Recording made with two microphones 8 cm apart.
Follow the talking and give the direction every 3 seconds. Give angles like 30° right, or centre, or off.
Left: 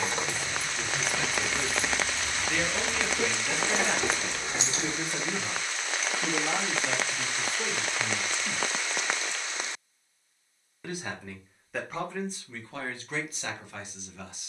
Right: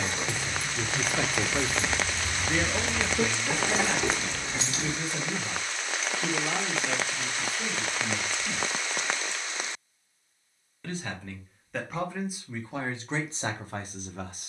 40° right, 10° left, 30° left, 10° left, 20° right.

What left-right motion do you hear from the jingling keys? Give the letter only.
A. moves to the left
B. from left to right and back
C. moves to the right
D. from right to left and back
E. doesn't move
B.